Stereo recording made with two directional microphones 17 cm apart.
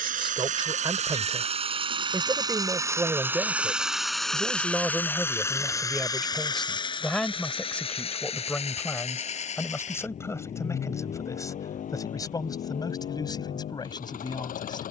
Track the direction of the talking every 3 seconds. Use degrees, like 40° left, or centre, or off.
20° right, 10° right, 10° left, 20° left, 20° left.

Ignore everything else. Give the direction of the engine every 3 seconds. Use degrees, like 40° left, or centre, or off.
40° right, centre, 30° left, 40° left, 50° left.